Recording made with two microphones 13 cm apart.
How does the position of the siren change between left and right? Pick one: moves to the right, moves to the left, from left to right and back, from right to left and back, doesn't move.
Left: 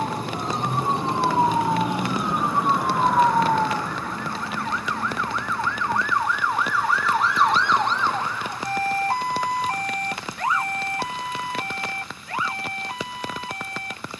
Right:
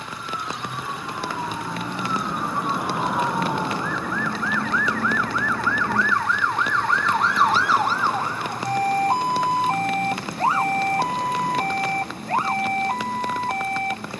moves to the right.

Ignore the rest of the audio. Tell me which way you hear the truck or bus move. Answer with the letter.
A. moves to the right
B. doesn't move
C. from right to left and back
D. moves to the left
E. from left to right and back
A.